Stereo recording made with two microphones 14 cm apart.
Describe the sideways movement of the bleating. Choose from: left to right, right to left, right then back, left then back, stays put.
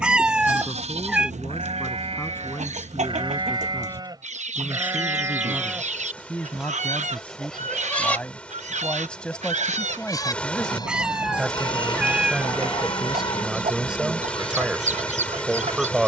right to left.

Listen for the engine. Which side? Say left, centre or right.
centre.